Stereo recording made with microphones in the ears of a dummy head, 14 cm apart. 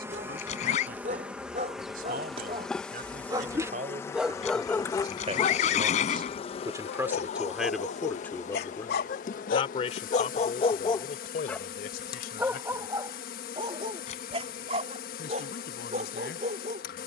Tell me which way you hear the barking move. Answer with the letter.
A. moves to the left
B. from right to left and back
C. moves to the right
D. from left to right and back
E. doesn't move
B.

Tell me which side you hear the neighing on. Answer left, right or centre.
left.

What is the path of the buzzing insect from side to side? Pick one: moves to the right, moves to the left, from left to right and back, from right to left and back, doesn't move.
moves to the left.